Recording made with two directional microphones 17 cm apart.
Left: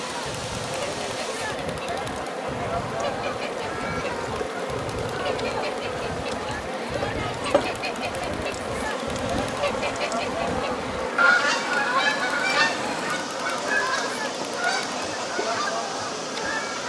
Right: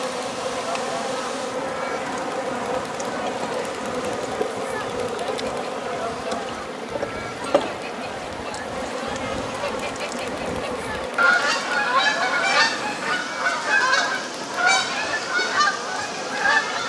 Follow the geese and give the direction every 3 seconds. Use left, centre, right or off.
left, left, left, centre, right, right.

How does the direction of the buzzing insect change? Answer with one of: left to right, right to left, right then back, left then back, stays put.
right to left.